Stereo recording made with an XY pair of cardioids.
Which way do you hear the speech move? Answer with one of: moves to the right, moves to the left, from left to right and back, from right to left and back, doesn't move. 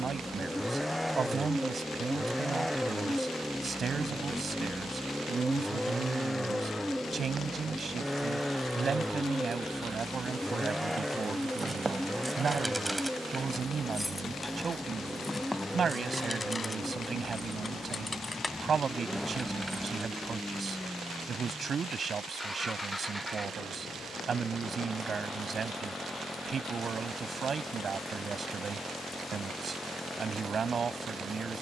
doesn't move.